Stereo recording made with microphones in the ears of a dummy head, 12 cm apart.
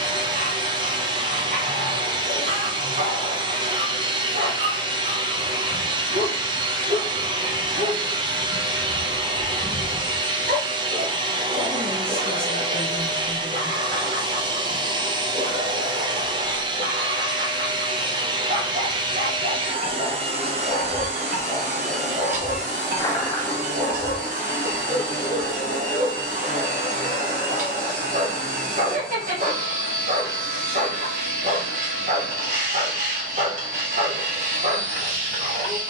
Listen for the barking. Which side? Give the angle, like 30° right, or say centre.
50° right.